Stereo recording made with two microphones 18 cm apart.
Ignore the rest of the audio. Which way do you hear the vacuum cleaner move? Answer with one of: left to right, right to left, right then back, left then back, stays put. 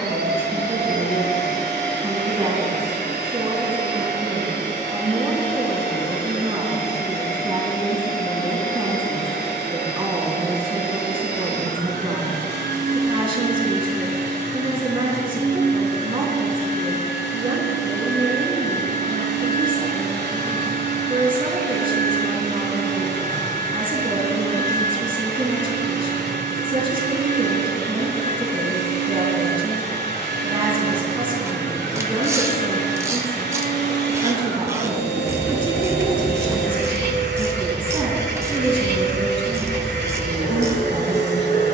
stays put.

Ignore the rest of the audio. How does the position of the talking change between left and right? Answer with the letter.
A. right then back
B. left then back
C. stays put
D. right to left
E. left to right
C.